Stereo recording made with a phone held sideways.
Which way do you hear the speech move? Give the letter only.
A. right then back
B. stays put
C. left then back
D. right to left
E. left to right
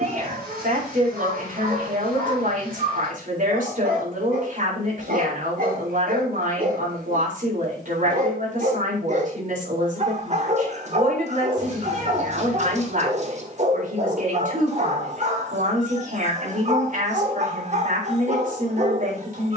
B.